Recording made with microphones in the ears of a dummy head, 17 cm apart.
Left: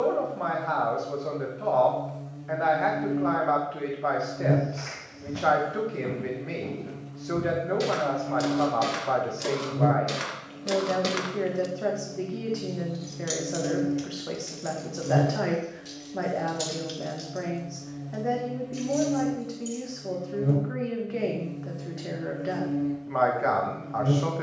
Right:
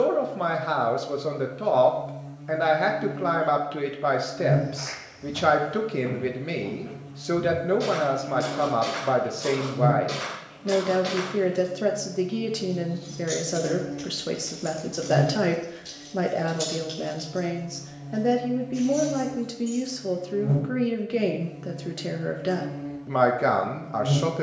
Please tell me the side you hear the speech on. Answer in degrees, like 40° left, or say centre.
40° right.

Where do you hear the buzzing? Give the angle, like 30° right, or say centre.
70° left.